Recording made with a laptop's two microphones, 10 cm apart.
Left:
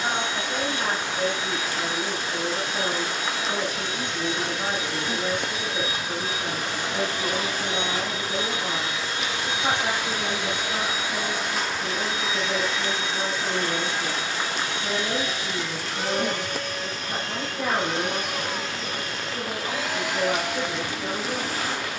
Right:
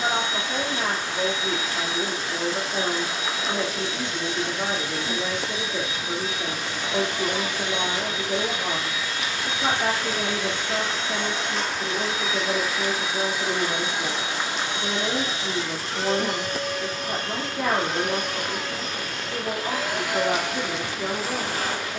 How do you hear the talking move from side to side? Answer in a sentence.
You can hear the talking stay put.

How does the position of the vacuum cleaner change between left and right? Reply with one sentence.
You can hear the vacuum cleaner move to the right.